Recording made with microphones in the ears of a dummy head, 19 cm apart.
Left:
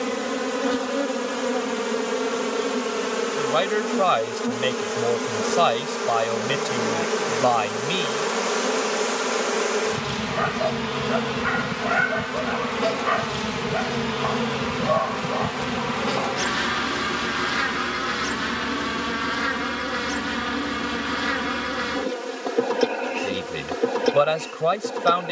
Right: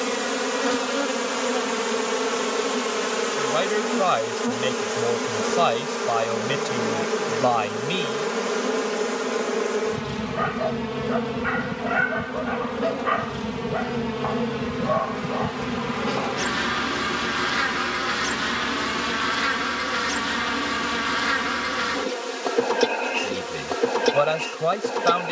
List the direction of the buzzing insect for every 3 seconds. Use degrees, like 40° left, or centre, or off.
30° right, 10° right, 20° left, 40° left, 50° left, 10° left, 30° right, 30° right, 30° right.